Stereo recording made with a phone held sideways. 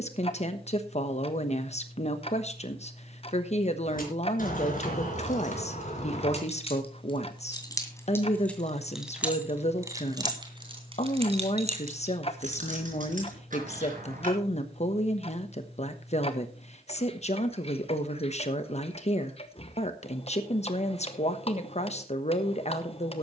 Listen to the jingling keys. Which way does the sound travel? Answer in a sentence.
In this clip you hear the jingling keys go from the left side to the right.